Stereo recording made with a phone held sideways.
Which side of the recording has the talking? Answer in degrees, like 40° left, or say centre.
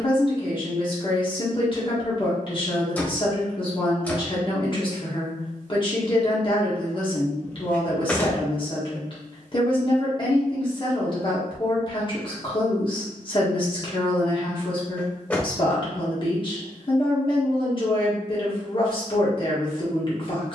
40° left.